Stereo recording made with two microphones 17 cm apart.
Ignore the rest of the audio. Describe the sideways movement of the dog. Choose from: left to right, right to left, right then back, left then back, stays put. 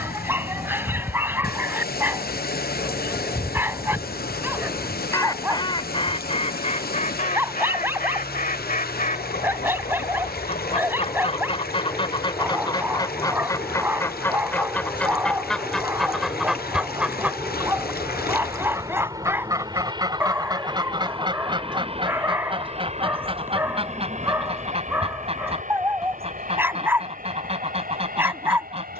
stays put.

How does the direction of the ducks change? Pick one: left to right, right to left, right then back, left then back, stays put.
left then back.